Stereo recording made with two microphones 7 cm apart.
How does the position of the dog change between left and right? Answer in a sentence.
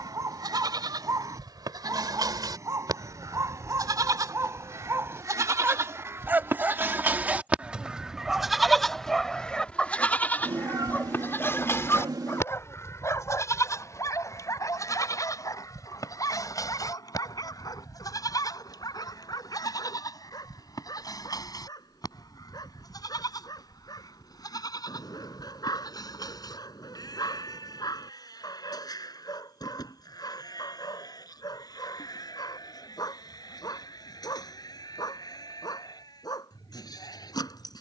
You can hear the dog go from the right side to the left.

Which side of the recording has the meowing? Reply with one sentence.
In this clip you hear the meowing on the right.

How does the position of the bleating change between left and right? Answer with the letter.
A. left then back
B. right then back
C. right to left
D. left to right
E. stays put
C.